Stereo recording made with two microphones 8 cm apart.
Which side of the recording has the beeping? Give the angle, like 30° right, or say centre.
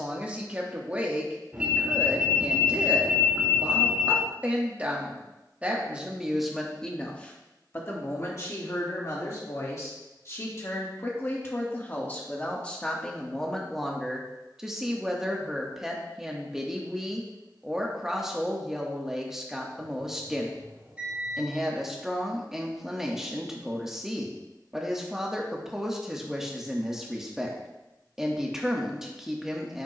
20° right.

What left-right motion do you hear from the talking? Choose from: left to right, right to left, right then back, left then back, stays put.
left then back.